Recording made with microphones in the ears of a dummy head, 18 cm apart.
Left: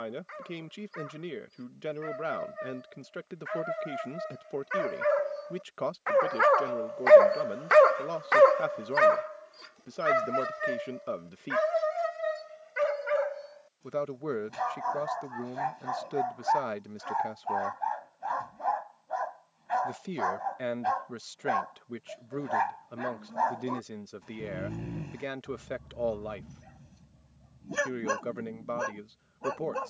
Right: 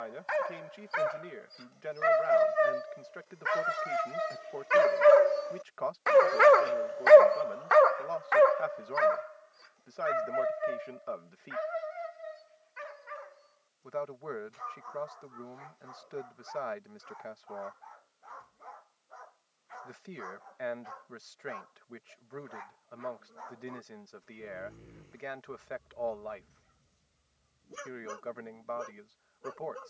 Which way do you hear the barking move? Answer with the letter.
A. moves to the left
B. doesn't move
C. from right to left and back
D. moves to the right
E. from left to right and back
A.